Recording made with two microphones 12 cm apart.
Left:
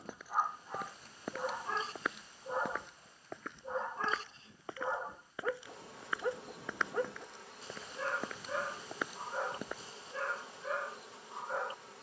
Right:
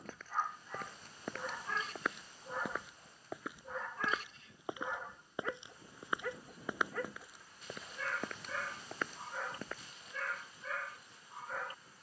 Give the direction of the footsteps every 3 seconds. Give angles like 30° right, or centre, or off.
centre, 10° right, 10° right, 10° left.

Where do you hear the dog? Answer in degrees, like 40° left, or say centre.
30° left.